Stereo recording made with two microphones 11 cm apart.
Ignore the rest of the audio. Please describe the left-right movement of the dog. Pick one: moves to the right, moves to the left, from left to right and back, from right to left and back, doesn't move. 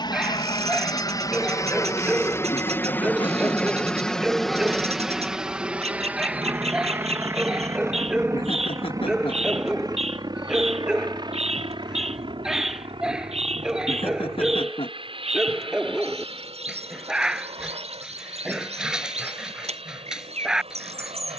doesn't move.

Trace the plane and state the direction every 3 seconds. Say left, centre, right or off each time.
left, centre, right, right, right, right, right.